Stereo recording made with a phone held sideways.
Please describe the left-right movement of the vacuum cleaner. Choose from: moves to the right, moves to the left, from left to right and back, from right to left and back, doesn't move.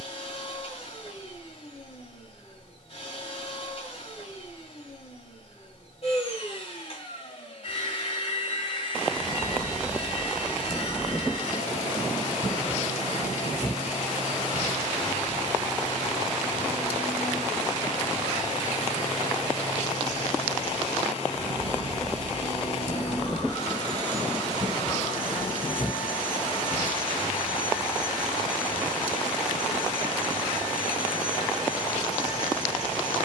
doesn't move.